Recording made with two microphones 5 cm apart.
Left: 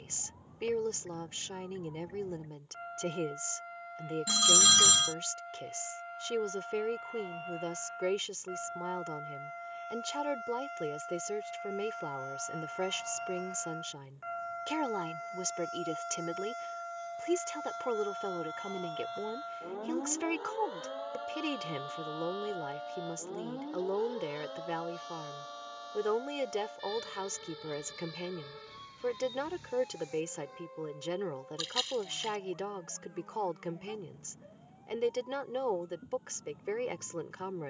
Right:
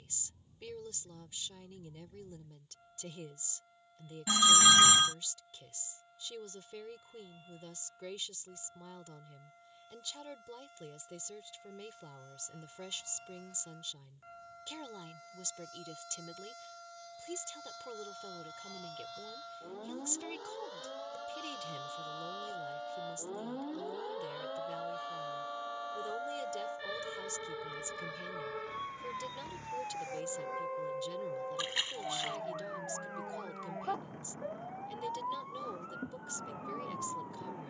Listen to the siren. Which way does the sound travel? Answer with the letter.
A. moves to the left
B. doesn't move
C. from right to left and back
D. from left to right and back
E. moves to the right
E.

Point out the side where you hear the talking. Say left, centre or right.
left.